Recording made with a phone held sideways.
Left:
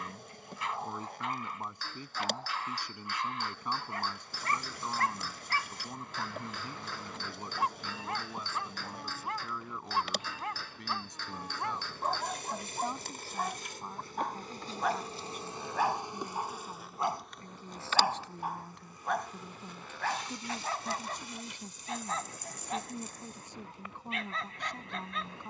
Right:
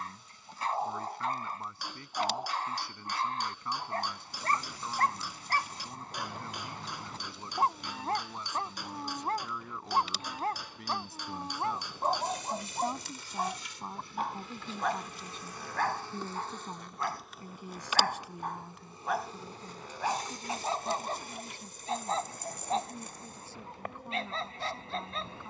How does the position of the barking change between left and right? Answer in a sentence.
You can hear the barking move from right to left and back again.